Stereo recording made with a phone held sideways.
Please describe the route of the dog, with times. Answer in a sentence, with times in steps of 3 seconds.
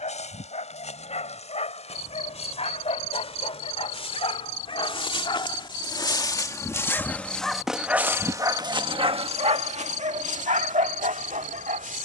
In this clip you hear the dog on the left from 0 s, in the centre from 6 s and on the right from 9 s.